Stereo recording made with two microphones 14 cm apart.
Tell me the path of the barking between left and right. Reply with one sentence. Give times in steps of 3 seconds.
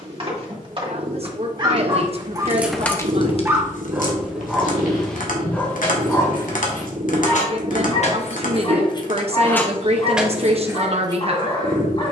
You can hear the barking on the right from 0 s, in the centre from 3 s and on the left from 6 s.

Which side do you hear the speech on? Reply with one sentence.
In this clip you hear the speech on the right.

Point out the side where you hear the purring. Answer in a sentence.
In this clip you hear the purring on the right.